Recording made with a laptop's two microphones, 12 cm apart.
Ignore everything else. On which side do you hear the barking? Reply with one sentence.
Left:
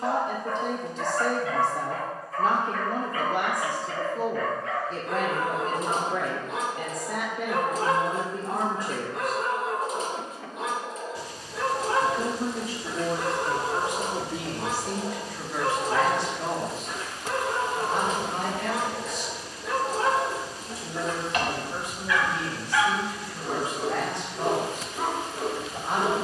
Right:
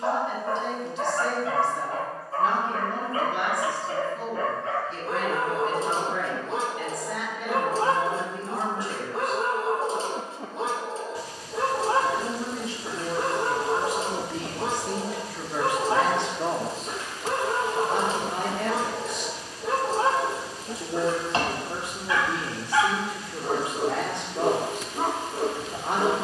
In this clip you hear the barking on the right.